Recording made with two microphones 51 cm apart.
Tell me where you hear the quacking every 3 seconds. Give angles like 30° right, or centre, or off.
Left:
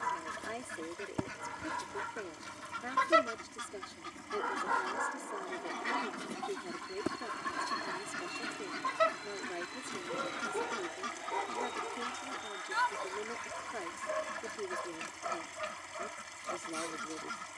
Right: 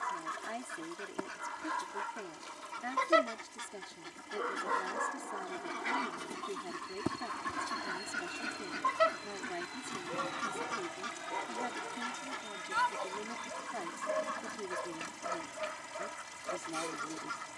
40° left, 30° left, centre, 10° left, 40° left, 50° left.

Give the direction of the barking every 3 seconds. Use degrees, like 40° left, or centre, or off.
50° left, 10° left, 20° right, 40° right, 50° right, 50° right.